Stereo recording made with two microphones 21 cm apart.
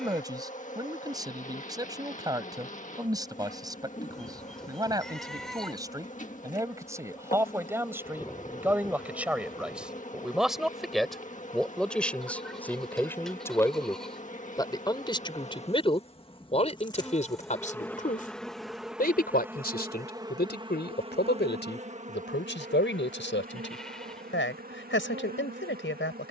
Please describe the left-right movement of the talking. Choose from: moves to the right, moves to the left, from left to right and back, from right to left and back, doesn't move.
moves to the left.